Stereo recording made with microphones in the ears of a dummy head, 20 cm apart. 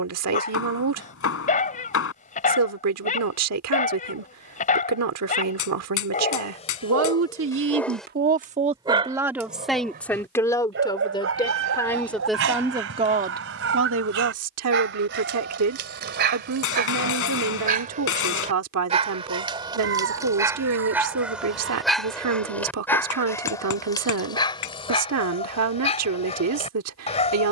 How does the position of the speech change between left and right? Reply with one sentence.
In this clip you hear the speech move from right to left and back again.